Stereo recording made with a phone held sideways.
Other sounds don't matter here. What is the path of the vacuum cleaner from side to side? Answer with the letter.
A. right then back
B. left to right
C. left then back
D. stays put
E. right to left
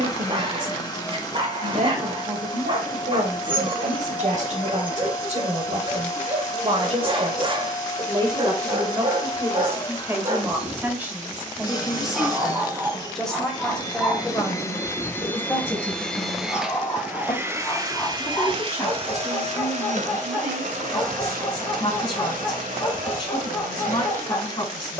B.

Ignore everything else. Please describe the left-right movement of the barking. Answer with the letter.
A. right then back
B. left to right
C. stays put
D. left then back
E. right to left
E.